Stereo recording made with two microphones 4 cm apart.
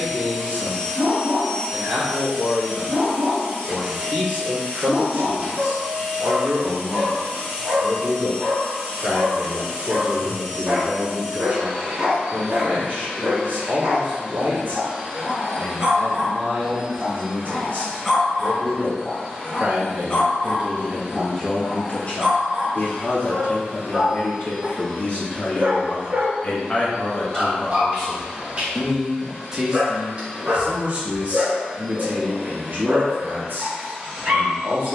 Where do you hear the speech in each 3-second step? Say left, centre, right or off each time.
right, right, right, right, right, right, right, left, left, centre, right, right.